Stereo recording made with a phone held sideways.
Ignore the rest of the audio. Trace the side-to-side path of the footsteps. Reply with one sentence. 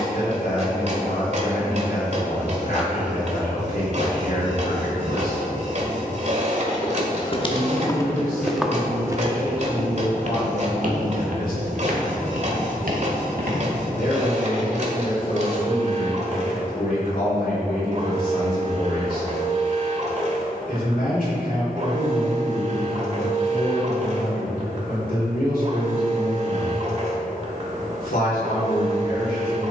In this clip you hear the footsteps move from left to right.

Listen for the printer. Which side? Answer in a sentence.
In this clip you hear the printer on the right.